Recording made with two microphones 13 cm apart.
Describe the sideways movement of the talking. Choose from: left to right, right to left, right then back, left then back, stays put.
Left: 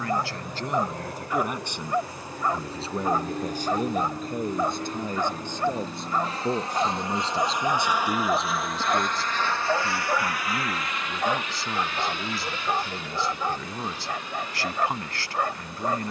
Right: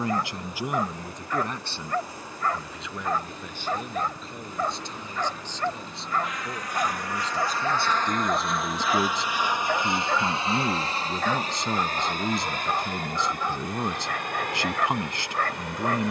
left then back.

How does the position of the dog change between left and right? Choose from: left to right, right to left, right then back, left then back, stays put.
stays put.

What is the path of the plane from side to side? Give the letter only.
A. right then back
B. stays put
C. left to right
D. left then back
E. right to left
C.